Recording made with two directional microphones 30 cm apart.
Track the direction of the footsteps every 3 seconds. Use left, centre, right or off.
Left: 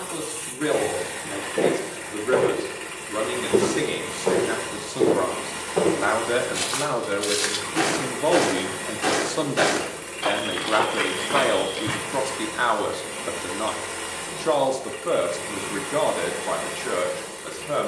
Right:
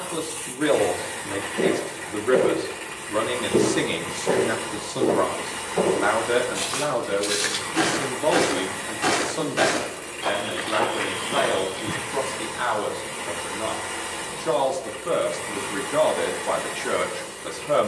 left, left, centre, left, off, off.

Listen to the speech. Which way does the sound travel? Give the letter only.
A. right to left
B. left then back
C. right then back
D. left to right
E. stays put
B.